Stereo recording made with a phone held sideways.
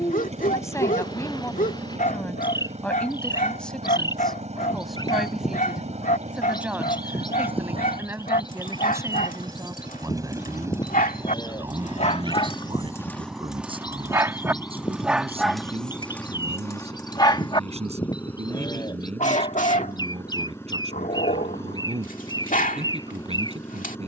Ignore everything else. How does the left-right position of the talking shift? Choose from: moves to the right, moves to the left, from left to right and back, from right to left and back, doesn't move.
moves to the right.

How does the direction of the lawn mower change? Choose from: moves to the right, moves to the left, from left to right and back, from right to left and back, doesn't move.
moves to the left.